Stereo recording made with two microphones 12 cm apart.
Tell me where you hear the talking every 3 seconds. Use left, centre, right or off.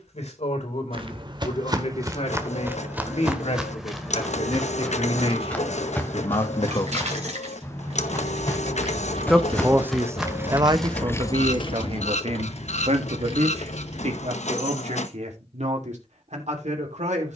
left, left, left, right, right, right.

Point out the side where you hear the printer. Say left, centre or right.
left.